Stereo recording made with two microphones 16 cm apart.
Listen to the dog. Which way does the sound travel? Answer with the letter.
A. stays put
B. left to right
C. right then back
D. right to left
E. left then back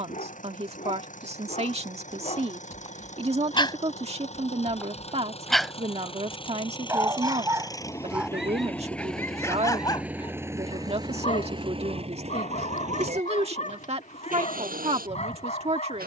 C.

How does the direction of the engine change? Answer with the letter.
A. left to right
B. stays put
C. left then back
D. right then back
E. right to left
A.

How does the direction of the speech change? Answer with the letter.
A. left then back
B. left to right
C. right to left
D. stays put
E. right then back
D.